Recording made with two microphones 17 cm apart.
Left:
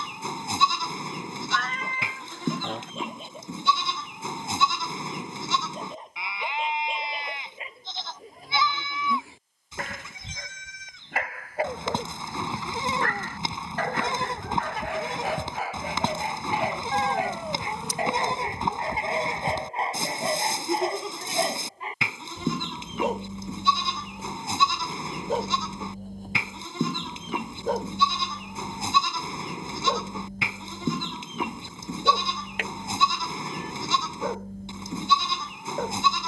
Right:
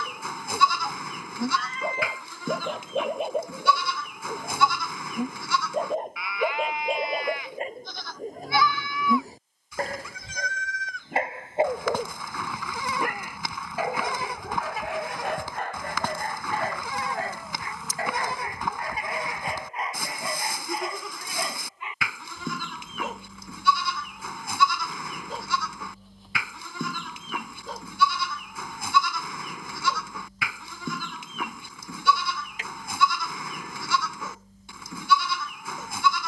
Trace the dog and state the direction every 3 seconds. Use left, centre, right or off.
right, right, right, right, centre, centre, left, left, left, left, left, left.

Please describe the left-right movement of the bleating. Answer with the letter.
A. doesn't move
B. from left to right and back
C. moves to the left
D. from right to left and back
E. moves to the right
A.